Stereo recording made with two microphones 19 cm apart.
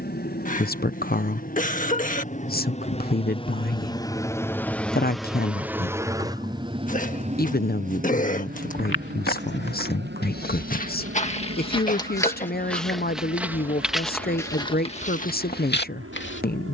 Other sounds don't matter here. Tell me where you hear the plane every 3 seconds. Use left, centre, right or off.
left, centre, right, right, right, right.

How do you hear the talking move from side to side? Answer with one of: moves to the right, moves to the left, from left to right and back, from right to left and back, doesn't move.
doesn't move.